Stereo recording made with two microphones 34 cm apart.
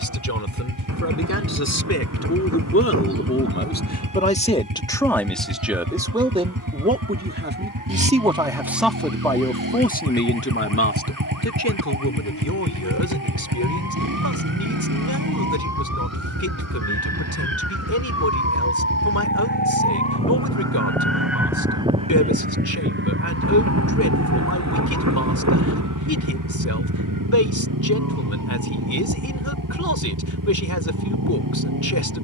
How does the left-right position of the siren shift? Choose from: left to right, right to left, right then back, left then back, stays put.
left to right.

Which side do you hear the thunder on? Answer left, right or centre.
right.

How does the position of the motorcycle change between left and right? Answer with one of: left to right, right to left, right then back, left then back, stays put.
stays put.